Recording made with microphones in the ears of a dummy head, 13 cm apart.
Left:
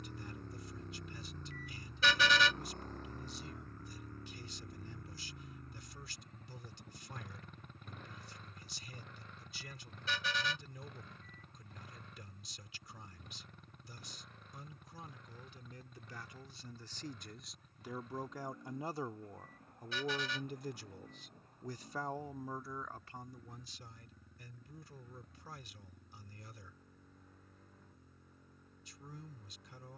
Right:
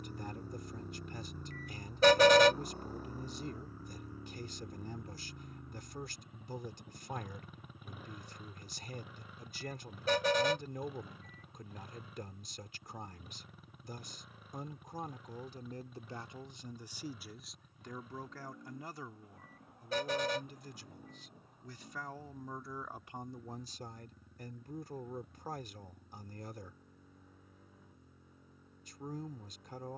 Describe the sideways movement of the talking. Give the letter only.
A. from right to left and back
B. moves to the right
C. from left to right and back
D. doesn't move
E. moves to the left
A.